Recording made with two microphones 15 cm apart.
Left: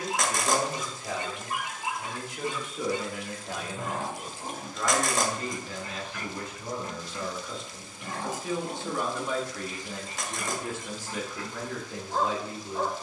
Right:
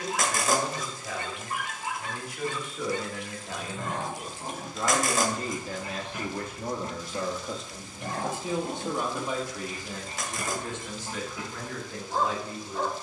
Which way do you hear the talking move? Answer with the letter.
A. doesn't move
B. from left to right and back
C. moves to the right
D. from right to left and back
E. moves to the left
B.